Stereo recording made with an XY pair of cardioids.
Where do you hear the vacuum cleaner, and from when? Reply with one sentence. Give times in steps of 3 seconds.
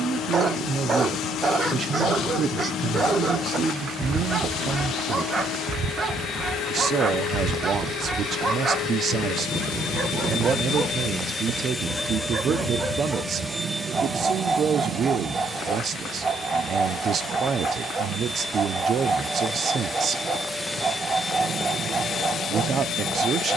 You can hear the vacuum cleaner on the left from 0 s, in the centre from 12 s, on the right from 15 s, in the centre from 18 s and on the left from 21 s.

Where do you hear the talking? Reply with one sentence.
In this clip you hear the talking on the right.